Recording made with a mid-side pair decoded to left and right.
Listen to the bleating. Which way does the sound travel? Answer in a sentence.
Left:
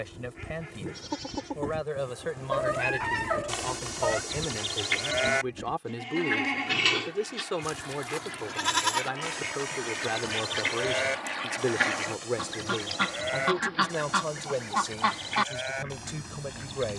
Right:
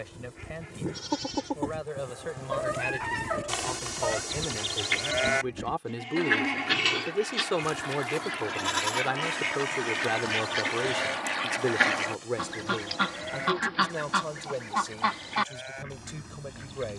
In this clip you hear the bleating move from right to left.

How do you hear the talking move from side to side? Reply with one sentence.
In this clip you hear the talking go right and come back.